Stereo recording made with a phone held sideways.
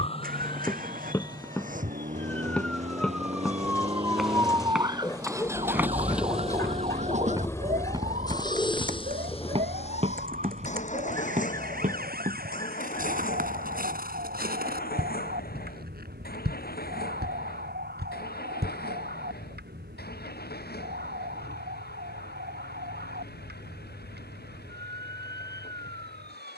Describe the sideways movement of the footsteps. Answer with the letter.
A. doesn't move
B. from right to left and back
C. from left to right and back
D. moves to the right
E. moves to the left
D.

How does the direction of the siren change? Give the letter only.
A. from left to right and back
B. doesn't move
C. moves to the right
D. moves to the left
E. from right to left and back
C.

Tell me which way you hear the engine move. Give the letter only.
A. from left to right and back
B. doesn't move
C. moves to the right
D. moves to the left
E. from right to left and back
D.